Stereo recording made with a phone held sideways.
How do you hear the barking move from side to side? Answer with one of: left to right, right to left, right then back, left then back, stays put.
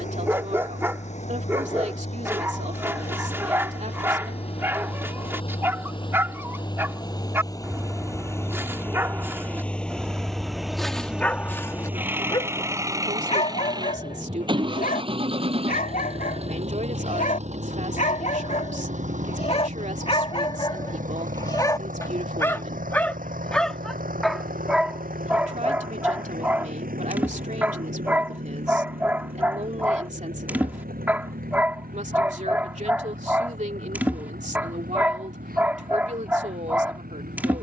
left then back.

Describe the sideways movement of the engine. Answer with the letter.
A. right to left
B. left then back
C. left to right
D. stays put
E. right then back
C.